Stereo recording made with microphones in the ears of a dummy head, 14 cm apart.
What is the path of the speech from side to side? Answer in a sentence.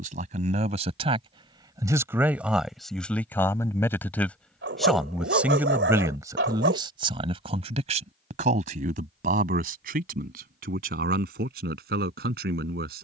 In this clip you hear the speech move from right to left and back again.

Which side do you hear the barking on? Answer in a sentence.
You can hear the barking on the right.